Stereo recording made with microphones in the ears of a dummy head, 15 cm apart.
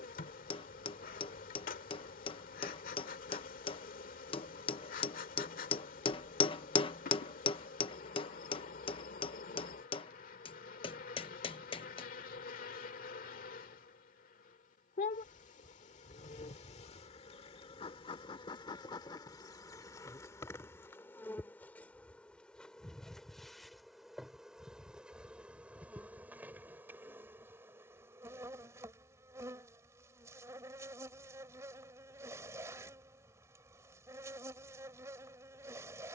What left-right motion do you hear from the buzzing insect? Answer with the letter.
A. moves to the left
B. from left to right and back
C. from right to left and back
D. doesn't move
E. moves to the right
E.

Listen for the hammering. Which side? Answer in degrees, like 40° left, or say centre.
30° left.